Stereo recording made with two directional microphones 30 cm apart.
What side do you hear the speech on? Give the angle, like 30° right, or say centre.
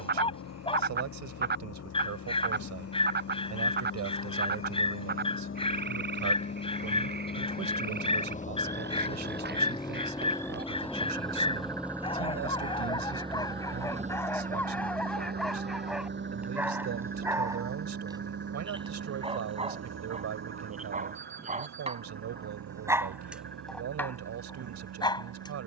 60° right.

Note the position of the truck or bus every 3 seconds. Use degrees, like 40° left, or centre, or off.
50° left, 40° left, 30° left, 10° left, 20° right, 40° right, 50° right, 60° right, 70° right.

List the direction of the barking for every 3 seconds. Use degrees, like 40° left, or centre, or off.
20° left, 20° left, 20° left, 20° left, 10° left, centre, 20° right, 10° right, 10° left.